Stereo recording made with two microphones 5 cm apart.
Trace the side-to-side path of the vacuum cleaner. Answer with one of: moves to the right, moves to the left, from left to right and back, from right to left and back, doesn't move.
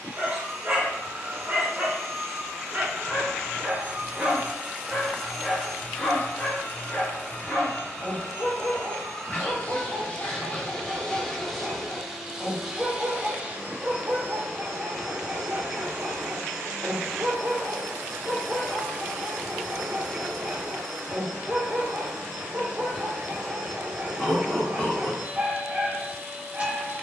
from right to left and back.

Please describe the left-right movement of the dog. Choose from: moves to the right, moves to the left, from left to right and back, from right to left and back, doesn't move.
from right to left and back.